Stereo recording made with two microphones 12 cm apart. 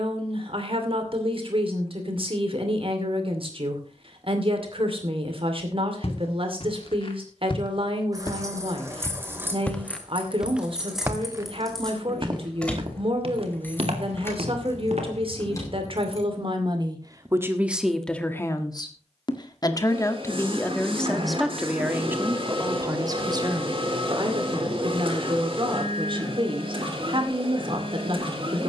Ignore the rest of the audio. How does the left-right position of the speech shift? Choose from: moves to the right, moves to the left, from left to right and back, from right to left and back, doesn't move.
from right to left and back.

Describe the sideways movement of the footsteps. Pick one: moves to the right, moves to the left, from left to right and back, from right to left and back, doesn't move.
moves to the right.